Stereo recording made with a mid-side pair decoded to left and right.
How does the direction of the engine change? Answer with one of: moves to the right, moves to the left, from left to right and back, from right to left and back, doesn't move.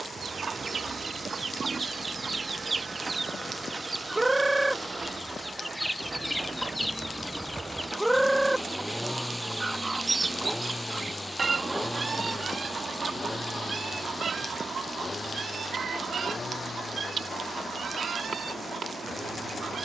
moves to the left.